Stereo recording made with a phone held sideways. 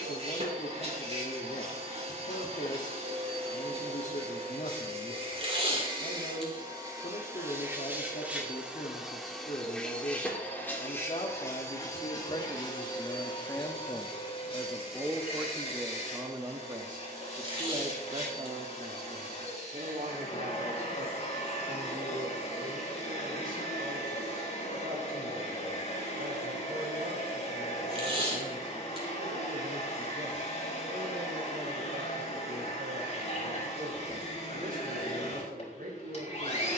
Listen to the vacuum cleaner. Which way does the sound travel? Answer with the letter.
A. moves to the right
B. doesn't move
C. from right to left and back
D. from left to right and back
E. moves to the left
E.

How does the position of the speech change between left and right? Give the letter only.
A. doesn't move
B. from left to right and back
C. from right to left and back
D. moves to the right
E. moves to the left
D.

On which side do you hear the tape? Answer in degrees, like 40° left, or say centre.
40° right.